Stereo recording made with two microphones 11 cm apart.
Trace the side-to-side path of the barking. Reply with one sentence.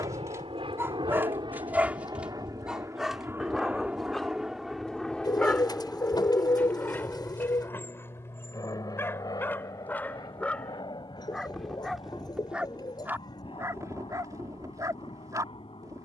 In this clip you hear the barking go left and come back.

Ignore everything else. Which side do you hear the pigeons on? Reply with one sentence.
In this clip you hear the pigeons on the left.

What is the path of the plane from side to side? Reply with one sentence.
You can hear the plane go from the right side to the left.